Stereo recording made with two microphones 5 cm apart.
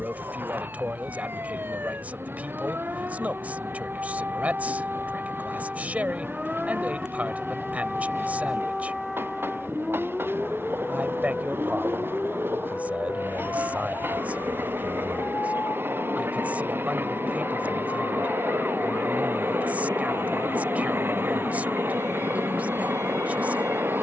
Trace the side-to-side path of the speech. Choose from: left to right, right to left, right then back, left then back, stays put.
stays put.